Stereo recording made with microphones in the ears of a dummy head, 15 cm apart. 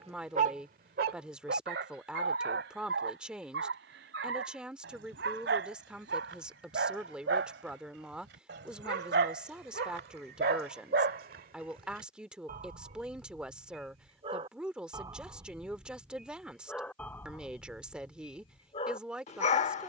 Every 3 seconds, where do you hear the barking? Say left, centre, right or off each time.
right, right, right, right, right, centre, left.